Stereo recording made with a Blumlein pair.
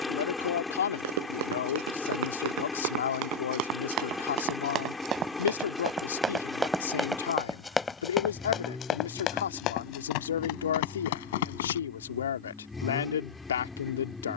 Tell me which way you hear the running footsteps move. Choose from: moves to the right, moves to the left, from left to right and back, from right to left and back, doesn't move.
moves to the left.